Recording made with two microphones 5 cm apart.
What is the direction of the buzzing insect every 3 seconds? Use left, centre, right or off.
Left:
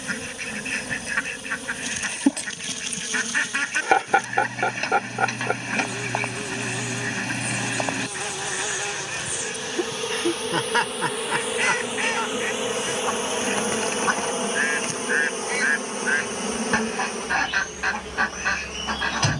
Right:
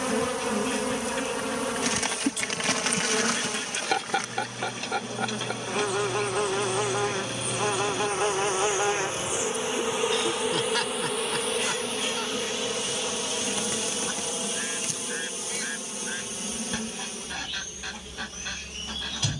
right, right, right, centre, left, left, left.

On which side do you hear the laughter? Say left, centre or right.
left.